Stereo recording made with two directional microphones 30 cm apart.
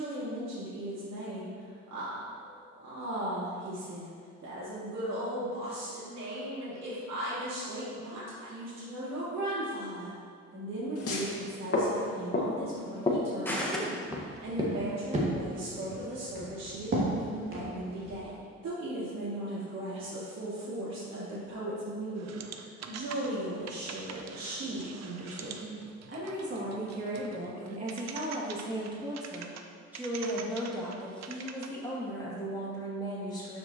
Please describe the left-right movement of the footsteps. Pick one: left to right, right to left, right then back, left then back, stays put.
left to right.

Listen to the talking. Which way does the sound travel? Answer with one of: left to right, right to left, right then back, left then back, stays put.
right to left.